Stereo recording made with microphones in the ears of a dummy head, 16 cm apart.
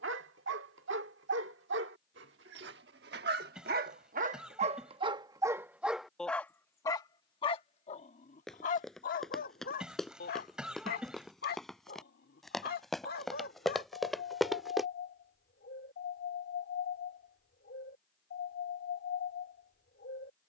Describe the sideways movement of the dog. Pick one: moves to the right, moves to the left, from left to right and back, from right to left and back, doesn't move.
moves to the left.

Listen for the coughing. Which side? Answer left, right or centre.
centre.